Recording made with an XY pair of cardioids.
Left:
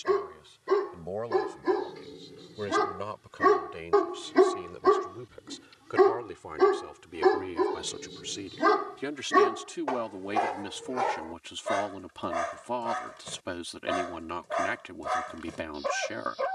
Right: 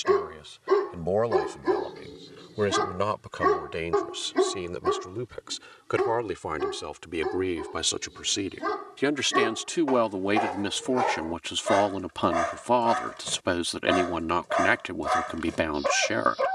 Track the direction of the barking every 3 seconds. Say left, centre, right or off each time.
centre, left, left, centre, right, right.